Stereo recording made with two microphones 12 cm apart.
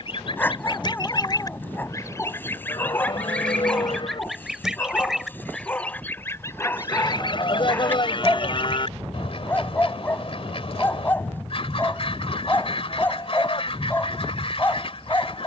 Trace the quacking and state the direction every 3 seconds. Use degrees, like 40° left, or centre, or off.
30° left, centre, 40° left, 50° left, 50° left.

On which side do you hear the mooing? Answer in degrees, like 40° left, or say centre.
40° left.